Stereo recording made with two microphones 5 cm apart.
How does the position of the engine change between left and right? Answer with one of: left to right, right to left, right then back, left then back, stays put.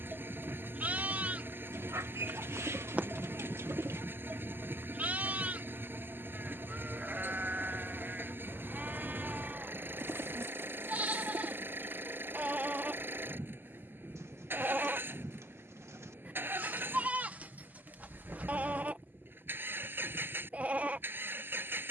stays put.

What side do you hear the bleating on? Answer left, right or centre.
right.